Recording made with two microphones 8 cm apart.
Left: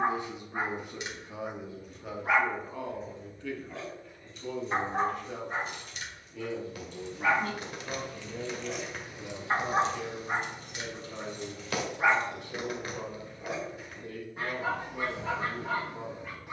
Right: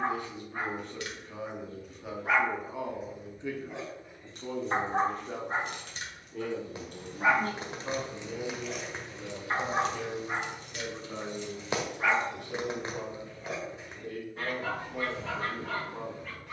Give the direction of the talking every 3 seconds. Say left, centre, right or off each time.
centre, right, right, right, right, right.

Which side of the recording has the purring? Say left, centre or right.
right.